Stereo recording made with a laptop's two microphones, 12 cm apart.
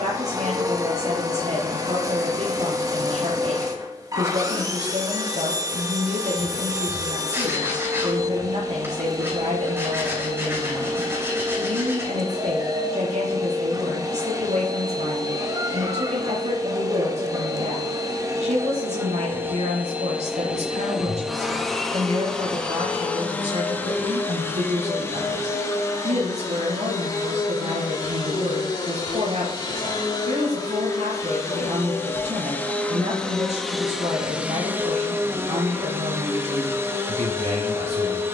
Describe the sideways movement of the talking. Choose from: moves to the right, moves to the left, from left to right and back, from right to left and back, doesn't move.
doesn't move.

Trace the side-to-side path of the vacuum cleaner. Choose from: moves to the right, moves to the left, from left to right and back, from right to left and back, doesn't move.
from right to left and back.